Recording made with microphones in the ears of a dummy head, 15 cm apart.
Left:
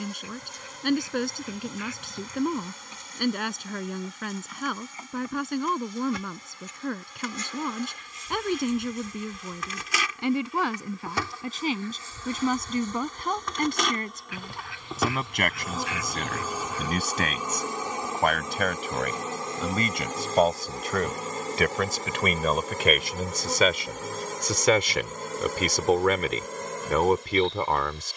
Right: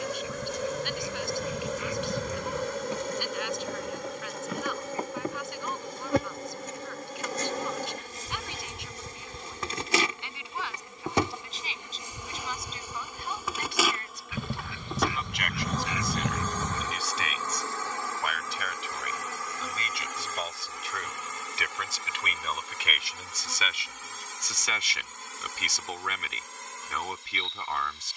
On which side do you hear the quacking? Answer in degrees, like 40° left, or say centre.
80° right.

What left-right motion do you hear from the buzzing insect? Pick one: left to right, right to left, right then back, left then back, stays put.
right to left.